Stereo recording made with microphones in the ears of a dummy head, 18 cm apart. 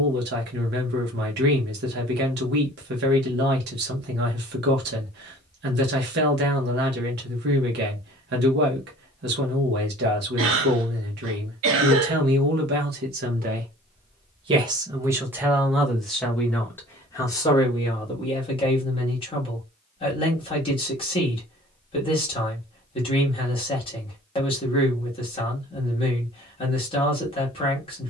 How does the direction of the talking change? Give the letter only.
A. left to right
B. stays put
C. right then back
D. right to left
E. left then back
D.